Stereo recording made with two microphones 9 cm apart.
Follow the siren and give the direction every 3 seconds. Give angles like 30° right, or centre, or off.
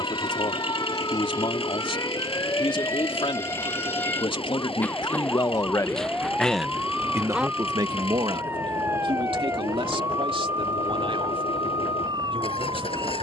40° left, 20° left, 10° right, 40° right, 50° right.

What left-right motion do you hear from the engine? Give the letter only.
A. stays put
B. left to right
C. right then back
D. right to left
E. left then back
A.